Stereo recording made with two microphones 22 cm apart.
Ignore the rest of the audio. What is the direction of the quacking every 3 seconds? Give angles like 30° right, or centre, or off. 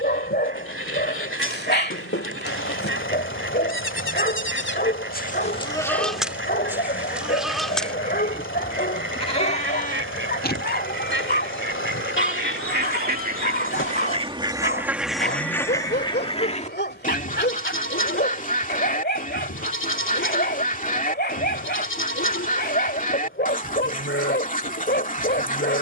80° right, 80° right, 80° right, 70° right, 40° right, 30° left, 40° left, 40° left, 40° left.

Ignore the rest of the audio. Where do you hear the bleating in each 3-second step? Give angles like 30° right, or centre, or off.
80° left, 60° left, centre, 50° left, 80° left, 80° left, 80° left, 80° left, 80° left.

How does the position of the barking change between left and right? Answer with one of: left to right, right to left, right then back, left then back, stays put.
stays put.